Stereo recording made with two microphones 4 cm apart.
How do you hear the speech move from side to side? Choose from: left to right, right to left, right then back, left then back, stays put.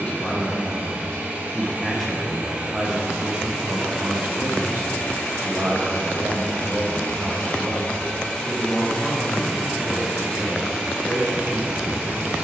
right then back.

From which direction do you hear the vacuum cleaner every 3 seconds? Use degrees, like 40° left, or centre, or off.
30° right, 10° left, 30° left, 10° right.